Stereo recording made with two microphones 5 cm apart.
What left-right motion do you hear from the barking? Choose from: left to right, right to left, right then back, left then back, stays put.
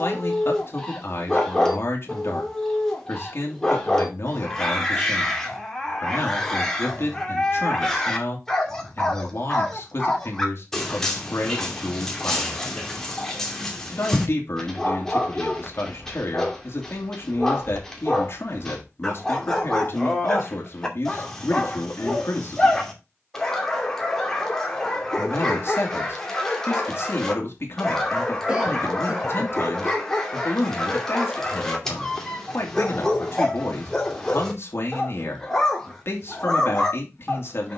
stays put.